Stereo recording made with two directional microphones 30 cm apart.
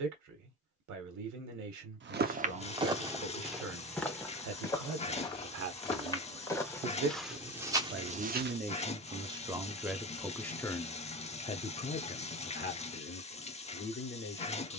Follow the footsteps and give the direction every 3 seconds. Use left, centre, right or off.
right, centre, centre, off, off.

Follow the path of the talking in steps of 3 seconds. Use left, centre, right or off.
right, right, right, centre, left.